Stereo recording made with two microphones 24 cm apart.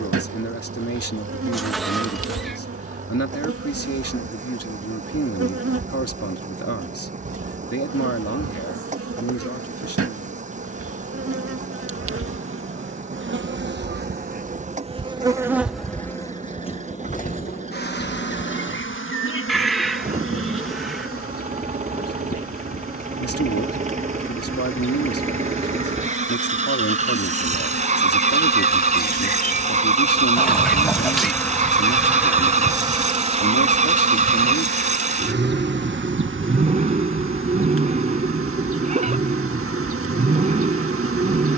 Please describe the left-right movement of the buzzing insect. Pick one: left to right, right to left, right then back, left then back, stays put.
left then back.